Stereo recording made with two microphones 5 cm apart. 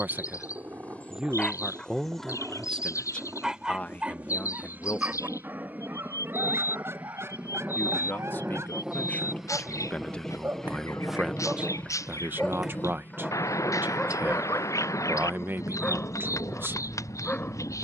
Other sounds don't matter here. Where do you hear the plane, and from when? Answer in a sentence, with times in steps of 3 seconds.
In this clip you hear the plane on the right from 0 s, in the centre from 9 s and on the left from 12 s.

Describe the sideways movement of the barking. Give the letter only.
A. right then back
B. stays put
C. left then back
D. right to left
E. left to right
A.